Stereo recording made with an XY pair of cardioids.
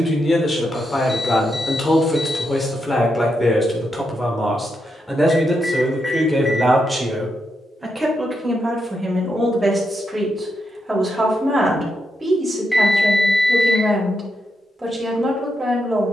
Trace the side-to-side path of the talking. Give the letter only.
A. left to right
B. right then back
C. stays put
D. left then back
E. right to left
A.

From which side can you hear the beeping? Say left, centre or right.
centre.